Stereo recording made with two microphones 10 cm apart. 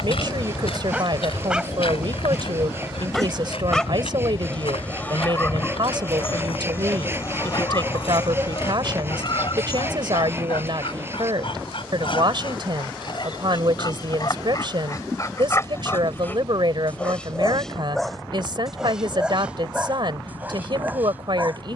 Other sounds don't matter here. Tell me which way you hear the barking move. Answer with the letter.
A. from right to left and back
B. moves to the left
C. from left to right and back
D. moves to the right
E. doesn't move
A.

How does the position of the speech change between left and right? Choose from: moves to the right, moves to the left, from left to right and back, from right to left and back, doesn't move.
doesn't move.